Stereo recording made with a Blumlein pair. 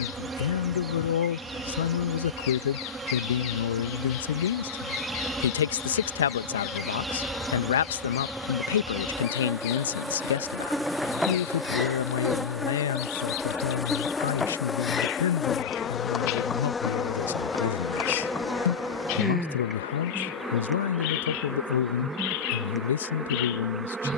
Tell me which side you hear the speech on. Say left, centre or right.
left.